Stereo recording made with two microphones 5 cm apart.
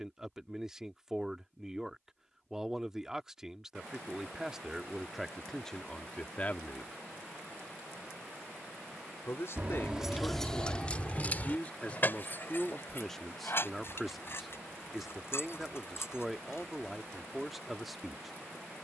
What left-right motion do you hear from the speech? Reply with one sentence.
In this clip you hear the speech move from right to left and back again.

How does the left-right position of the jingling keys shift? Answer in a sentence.
You can hear the jingling keys travel towards the left.